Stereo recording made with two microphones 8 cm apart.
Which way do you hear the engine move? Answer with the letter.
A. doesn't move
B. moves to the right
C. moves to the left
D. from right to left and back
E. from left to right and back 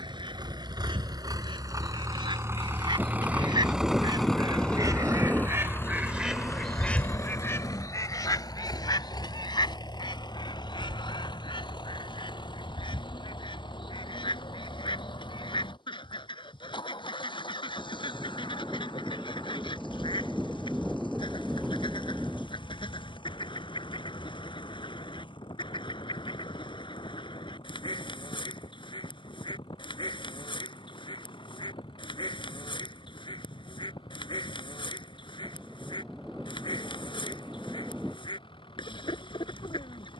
C.